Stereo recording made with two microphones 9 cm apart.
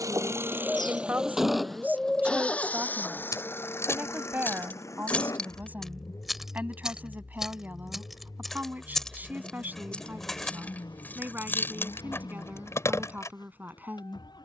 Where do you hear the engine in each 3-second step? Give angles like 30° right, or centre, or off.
centre, 30° left, 40° left, 50° left, 50° left.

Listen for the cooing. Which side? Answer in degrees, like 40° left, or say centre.
centre.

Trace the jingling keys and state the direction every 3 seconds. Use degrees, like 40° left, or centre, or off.
off, 20° left, centre, 20° left, 30° left.